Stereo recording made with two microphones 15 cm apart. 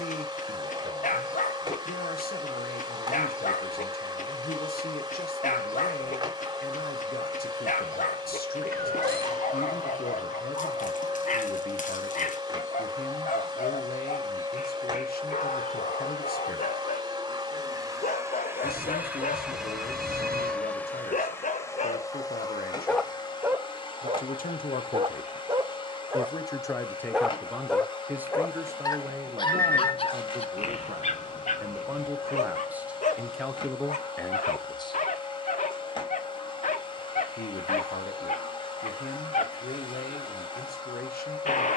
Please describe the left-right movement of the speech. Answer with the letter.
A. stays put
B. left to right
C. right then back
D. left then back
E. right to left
C.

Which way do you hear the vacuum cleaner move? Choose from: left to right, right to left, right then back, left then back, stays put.
right to left.